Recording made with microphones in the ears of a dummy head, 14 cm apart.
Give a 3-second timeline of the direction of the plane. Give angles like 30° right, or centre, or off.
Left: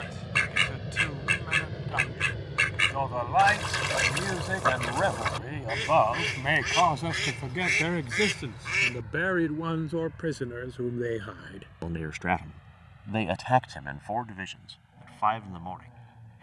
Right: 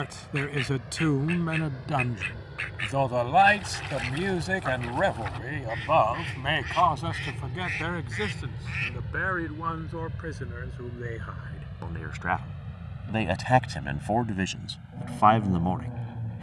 30° left, 10° left, 20° right, 40° right, 50° right, 60° right.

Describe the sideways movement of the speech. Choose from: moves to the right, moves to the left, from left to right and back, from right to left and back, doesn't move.
from right to left and back.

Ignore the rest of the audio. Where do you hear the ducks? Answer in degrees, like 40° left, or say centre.
80° left.